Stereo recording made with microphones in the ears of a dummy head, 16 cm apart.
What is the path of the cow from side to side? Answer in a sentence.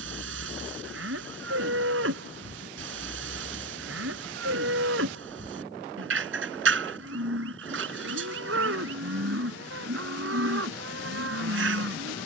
You can hear the cow stay in one place.